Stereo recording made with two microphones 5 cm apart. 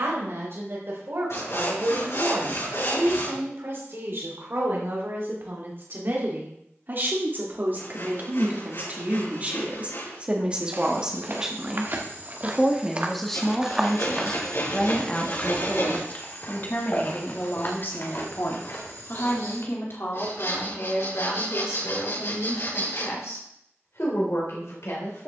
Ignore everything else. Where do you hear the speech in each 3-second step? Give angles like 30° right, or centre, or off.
60° right, 60° right, 40° right, 20° right, 10° left, 40° left, 60° left, 70° left, 70° left.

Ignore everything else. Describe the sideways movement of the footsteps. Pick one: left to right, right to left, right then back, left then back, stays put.
right to left.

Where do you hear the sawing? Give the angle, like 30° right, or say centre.
70° left.